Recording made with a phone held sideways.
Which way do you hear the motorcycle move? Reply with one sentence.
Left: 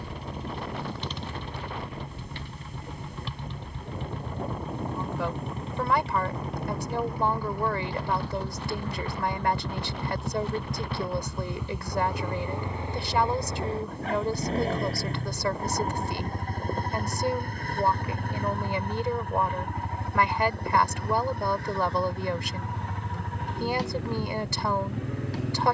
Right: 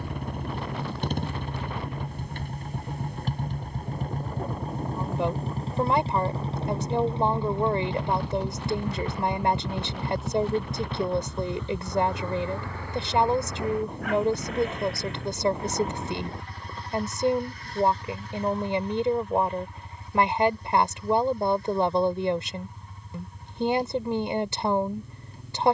You can hear the motorcycle go from the right side to the left.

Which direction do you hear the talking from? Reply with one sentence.
You can hear the talking on the right.